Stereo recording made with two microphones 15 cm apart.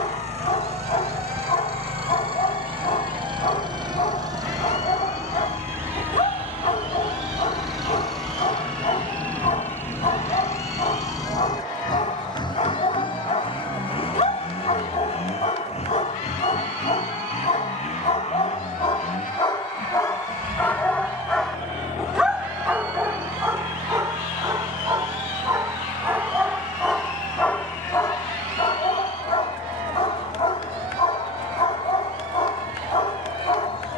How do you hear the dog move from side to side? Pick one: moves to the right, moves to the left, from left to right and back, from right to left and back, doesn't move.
from left to right and back.